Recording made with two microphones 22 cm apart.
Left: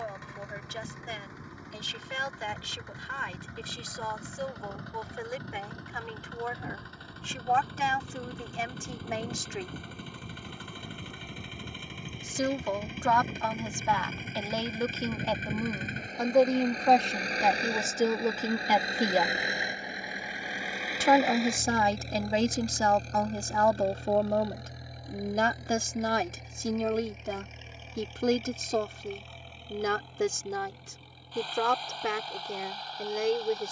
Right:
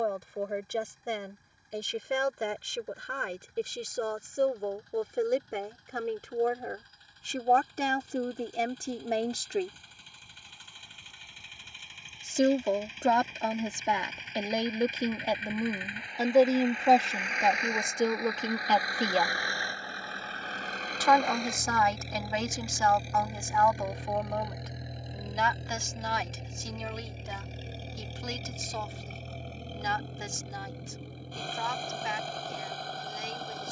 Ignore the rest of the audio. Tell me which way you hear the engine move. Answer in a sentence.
You can hear the engine go from the left side to the right.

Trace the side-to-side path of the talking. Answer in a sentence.
You can hear the talking move to the left.